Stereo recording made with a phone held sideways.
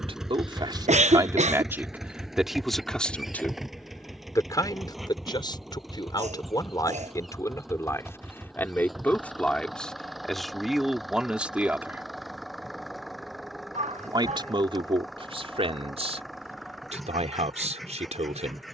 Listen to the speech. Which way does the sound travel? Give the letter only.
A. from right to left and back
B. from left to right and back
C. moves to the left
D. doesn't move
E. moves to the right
A.